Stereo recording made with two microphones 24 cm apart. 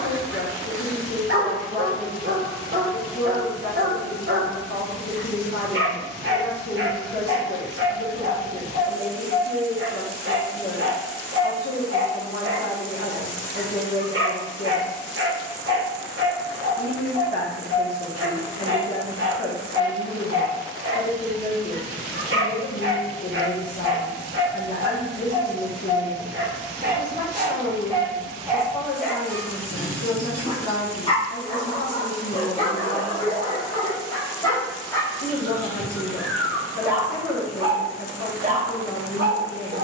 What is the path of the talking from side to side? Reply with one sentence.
In this clip you hear the talking stay put.